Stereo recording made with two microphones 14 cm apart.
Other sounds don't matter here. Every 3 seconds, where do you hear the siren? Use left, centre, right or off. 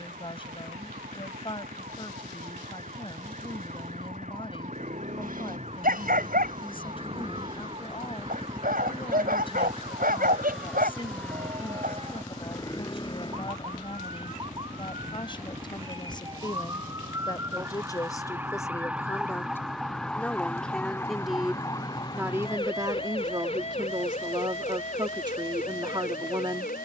right, right, right, right, right, right, centre, left, left.